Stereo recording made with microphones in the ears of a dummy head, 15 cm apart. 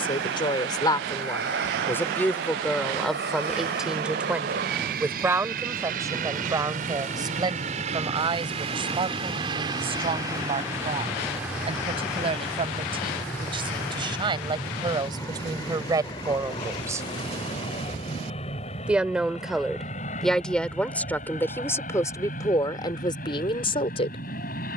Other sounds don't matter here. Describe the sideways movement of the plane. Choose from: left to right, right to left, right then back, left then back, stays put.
right to left.